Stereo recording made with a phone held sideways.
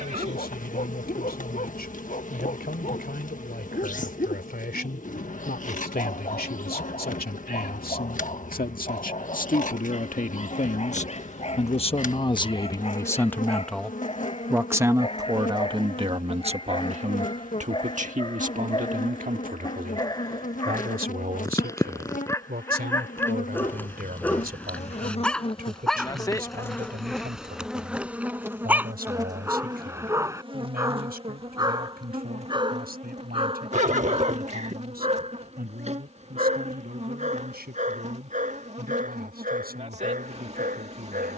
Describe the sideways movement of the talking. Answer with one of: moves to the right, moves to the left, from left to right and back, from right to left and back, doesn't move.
moves to the right.